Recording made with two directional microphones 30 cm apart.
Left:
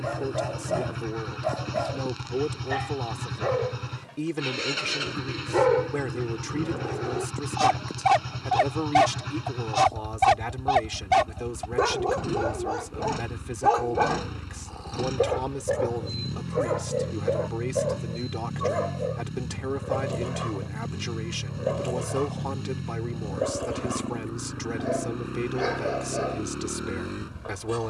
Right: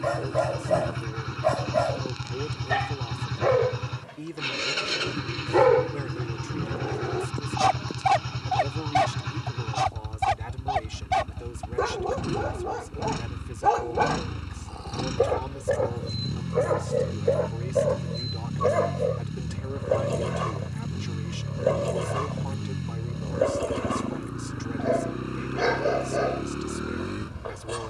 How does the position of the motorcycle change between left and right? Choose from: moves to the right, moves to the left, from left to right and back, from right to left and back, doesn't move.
doesn't move.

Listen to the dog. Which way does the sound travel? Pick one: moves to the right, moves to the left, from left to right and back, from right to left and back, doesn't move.
from right to left and back.